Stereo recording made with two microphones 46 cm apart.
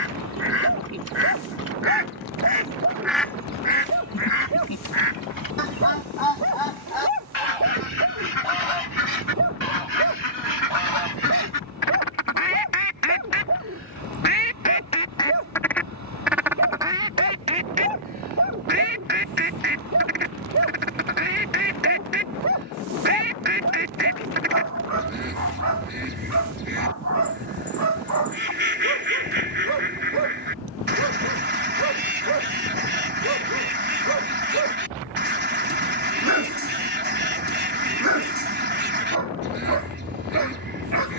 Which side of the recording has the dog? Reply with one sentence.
In this clip you hear the dog on the right.